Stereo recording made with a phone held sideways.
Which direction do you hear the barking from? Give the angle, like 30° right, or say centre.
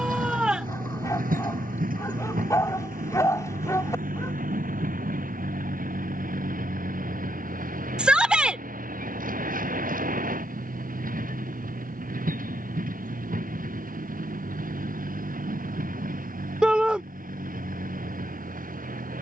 20° left.